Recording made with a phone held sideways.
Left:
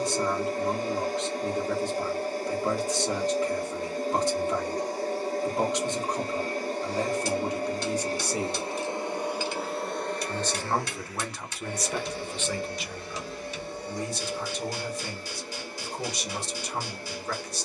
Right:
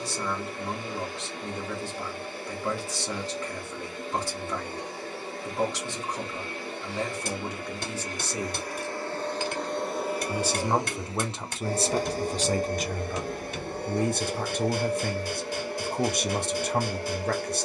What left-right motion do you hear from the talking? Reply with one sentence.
In this clip you hear the talking move from left to right.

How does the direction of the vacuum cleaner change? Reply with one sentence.
In this clip you hear the vacuum cleaner move to the right.